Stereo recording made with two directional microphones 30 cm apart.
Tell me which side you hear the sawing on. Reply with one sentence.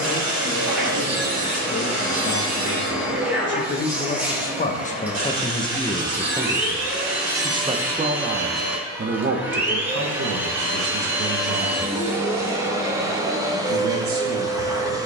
You can hear the sawing on the right.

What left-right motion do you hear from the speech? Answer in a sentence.
In this clip you hear the speech go from the left side to the right.